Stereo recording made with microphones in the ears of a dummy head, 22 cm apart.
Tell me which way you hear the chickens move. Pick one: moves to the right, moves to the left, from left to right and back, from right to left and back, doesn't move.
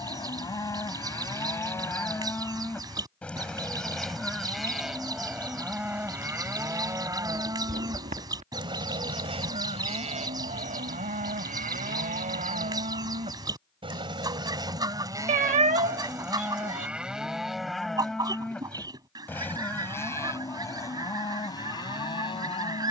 doesn't move.